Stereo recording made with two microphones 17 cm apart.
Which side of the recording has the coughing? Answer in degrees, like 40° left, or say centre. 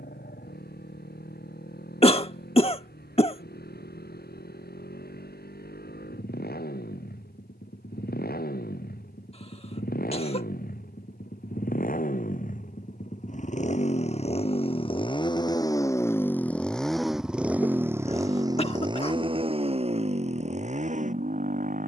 40° left.